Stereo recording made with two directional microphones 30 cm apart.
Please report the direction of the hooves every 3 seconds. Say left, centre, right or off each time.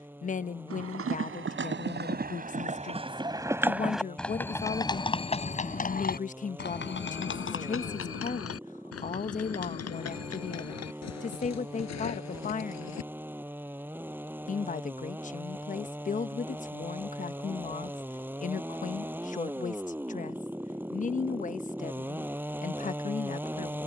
right, centre, left, left, left, off, off, off.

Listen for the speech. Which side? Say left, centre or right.
left.